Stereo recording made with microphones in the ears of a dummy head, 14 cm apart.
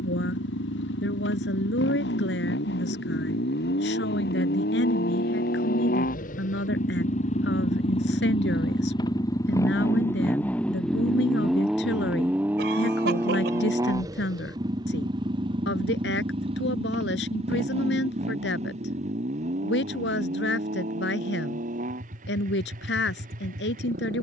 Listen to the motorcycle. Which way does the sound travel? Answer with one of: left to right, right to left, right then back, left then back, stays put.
left to right.